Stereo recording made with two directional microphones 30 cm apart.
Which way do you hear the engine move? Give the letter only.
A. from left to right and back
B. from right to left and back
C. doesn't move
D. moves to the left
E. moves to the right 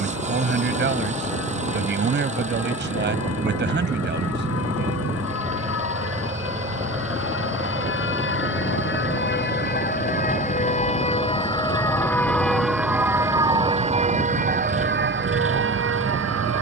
C.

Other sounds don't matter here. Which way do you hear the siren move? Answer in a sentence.
You can hear the siren go from the left side to the right.